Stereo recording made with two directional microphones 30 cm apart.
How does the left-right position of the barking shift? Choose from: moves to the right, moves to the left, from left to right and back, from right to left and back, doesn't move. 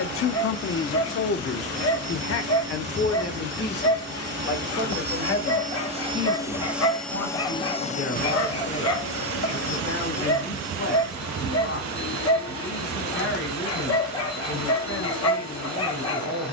doesn't move.